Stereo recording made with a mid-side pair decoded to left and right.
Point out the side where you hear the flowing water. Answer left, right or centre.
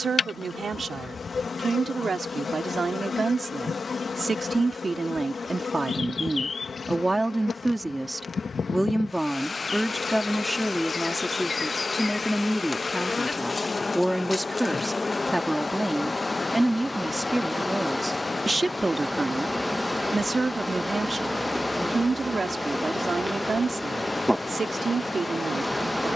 left.